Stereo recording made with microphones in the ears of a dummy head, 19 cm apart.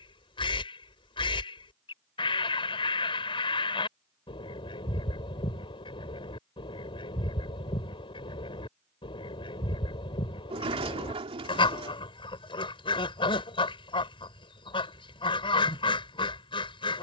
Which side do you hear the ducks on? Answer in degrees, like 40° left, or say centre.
20° left.